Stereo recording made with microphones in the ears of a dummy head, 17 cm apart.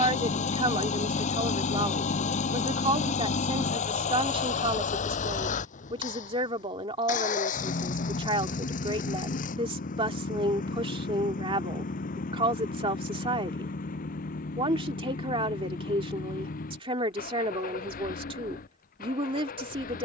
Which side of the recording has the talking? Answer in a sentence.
You can hear the talking on the right.